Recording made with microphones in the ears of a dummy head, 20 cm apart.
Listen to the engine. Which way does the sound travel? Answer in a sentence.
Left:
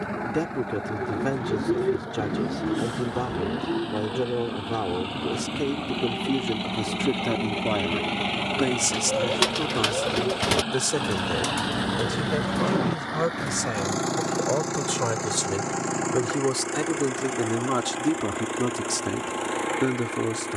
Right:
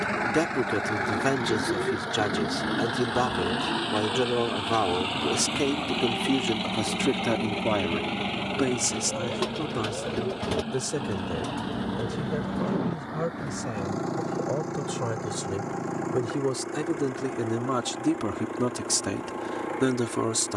In this clip you hear the engine move to the left.